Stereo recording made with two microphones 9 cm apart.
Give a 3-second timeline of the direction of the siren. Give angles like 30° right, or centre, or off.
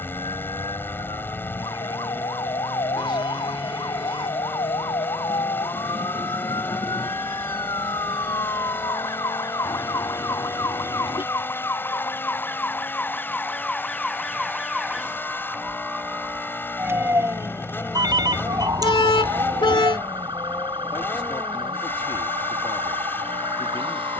60° left, 60° left, 50° left, 40° left, 10° left, 20° right, 40° right, 60° right.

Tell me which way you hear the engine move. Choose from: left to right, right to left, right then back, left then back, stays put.
stays put.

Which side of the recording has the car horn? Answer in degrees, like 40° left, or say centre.
60° left.